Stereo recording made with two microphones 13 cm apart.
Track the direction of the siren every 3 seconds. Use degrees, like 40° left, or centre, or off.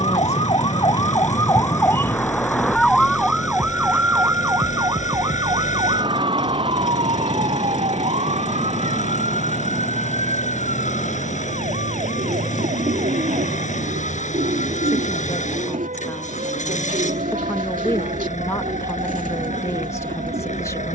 20° left, 20° right, 50° right, 60° right, 60° right, 70° right, 70° right.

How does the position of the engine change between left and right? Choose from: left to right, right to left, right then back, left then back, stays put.
stays put.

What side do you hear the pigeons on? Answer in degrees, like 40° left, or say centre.
80° right.